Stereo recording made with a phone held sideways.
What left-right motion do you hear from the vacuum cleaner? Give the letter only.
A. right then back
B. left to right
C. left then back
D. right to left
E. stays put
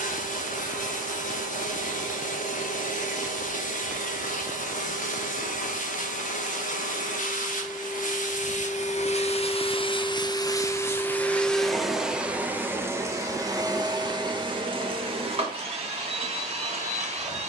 B.